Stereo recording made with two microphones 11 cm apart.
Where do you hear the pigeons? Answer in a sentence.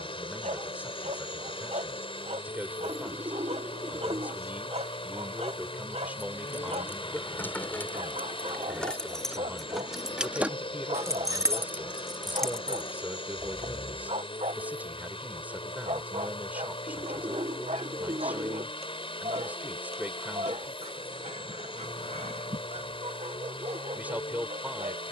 In this clip you hear the pigeons on the right.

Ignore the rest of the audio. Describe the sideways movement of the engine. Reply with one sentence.
You can hear the engine stay put.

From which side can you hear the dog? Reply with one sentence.
In this clip you hear the dog on the right.